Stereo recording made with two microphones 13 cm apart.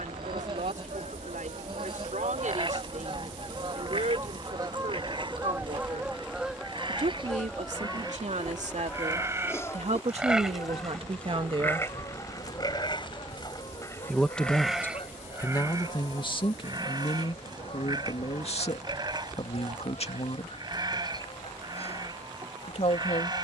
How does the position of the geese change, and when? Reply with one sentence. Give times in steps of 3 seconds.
In this clip you hear the geese on the right from 0 s, in the centre from 6 s and on the left from 9 s.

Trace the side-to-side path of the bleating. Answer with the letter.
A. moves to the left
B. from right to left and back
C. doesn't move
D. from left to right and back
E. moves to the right
B.